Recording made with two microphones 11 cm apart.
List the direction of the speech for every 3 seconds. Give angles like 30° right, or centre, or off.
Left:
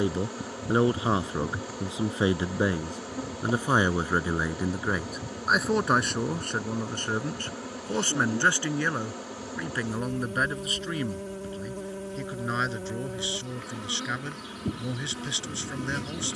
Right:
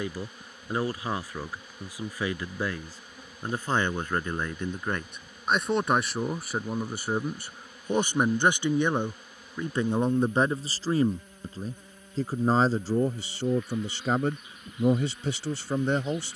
20° left, 10° left, 10° right, 30° right, 50° right, 50° right.